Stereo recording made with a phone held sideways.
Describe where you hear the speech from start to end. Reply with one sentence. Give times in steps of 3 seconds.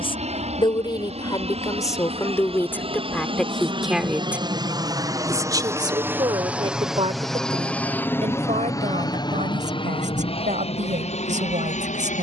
In this clip you hear the speech on the left from 0 s, in the centre from 3 s and on the right from 6 s.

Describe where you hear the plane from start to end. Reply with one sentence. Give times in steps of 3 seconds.
You can hear the plane on the right from 0 s, in the centre from 6 s and on the left from 9 s.